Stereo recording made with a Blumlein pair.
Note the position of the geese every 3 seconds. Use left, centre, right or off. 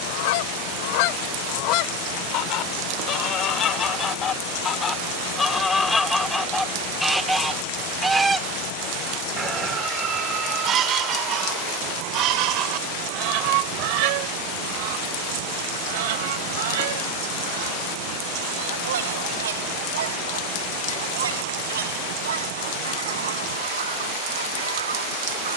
left, left, centre, right, right, right, right, right, right.